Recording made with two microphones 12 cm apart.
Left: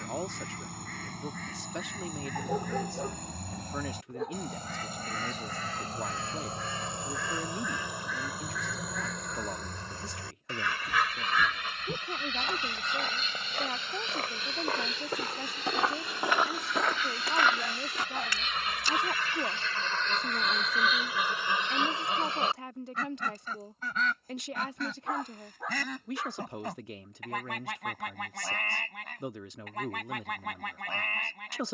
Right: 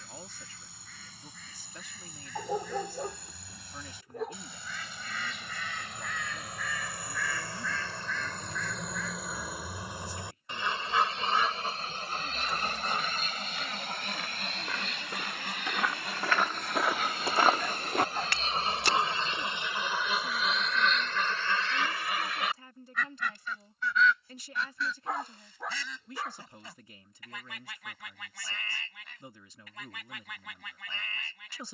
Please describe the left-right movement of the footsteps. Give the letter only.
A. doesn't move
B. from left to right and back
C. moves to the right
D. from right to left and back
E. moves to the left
C.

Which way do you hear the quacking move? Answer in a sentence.
In this clip you hear the quacking move from left to right and back again.